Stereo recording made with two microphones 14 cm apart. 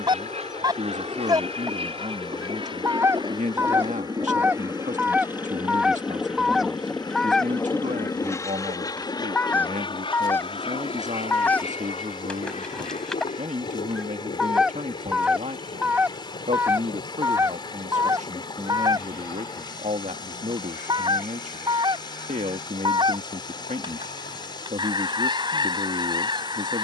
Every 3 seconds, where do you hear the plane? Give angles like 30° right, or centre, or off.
50° right, 20° right, 10° left, 40° left, 50° left, 60° left, 70° left, 70° left, 70° left.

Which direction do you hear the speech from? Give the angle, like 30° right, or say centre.
60° right.